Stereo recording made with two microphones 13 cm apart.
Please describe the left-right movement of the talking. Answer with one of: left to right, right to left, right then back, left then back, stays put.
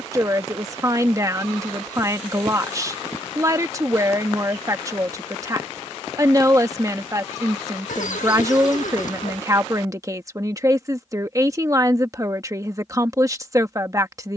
stays put.